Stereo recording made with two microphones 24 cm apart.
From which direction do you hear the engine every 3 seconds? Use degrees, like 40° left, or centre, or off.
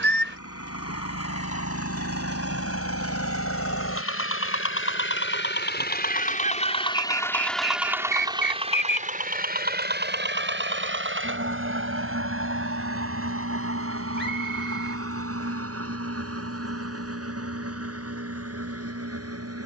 80° left, 60° left, centre, 50° right, 70° right, 70° right, 70° right.